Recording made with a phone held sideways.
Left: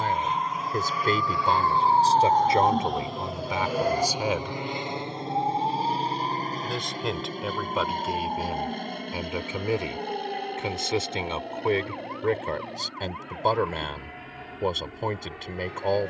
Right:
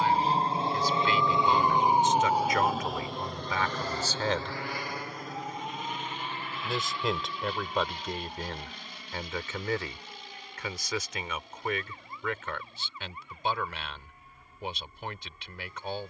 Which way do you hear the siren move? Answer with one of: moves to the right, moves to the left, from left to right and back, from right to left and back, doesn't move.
moves to the left.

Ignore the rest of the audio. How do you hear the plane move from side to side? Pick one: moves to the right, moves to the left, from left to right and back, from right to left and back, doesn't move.
moves to the left.